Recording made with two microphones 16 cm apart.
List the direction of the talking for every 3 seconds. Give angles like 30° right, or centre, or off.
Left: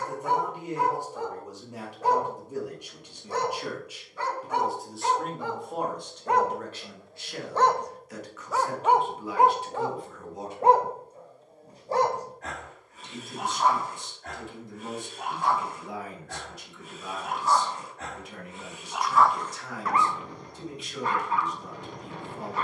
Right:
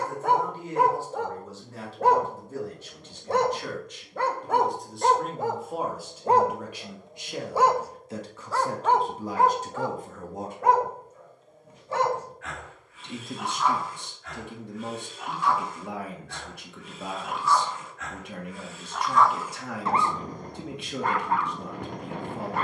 20° left, centre, 20° right, 50° right, 70° right, 70° right, 70° right, 70° right.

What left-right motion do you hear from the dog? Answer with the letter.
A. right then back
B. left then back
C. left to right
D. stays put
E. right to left
B.